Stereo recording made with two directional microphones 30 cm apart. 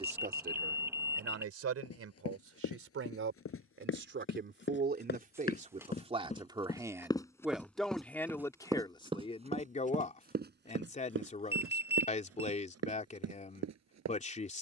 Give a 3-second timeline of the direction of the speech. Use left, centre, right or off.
right, right, centre, left, left.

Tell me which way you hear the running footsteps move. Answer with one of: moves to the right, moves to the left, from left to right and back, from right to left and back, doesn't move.
moves to the right.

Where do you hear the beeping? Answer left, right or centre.
centre.